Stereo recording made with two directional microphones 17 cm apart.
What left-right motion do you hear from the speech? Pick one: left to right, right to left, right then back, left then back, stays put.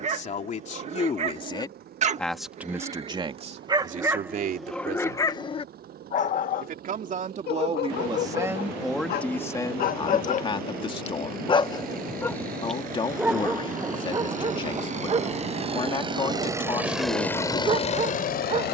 right then back.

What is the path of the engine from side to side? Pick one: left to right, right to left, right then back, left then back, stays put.
right to left.